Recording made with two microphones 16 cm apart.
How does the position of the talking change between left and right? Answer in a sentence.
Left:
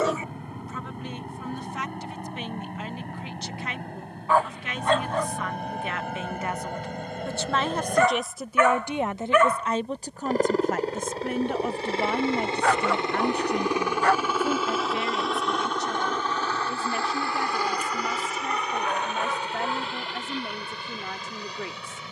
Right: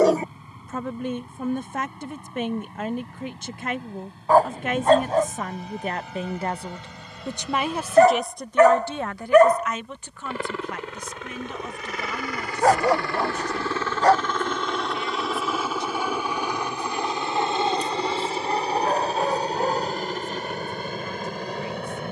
You can hear the talking move from right to left.